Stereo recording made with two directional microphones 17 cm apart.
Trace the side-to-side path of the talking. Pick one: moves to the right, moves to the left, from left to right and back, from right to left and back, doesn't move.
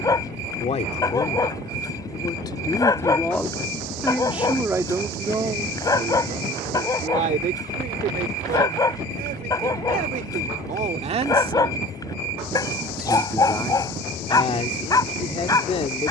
from left to right and back.